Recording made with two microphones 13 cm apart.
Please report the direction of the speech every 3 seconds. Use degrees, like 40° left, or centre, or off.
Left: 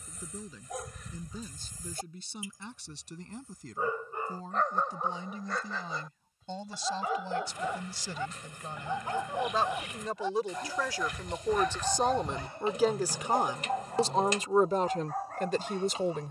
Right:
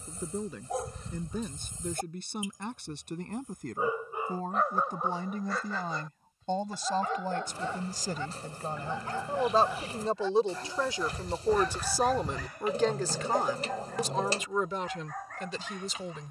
60° right, 60° right, 50° right, 30° right, 20° left, 50° left.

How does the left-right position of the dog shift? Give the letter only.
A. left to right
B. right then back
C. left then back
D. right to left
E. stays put
D.